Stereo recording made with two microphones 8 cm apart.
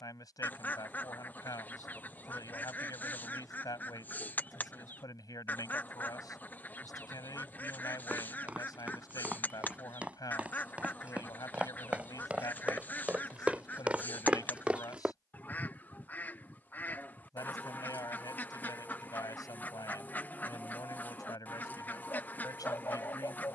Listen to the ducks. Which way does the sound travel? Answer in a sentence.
In this clip you hear the ducks stay put.